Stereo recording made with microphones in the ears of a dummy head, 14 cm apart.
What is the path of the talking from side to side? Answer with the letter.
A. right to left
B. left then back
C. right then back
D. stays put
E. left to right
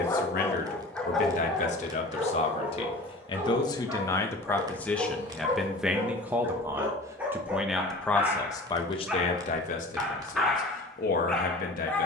C.